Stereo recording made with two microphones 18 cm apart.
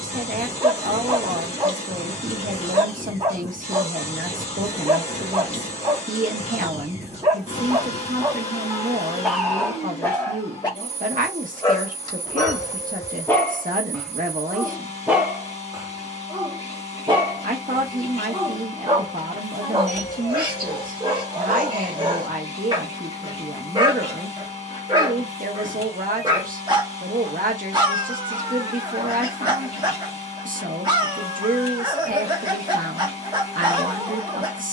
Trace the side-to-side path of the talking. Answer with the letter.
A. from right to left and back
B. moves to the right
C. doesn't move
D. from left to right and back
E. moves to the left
C.